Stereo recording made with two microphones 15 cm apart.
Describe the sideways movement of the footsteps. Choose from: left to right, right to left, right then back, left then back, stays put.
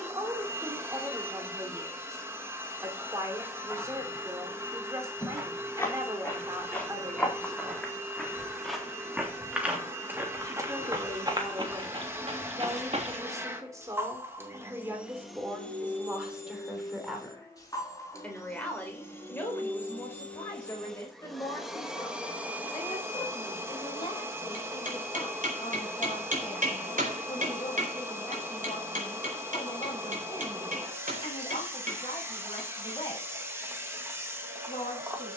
left to right.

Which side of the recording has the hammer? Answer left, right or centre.
right.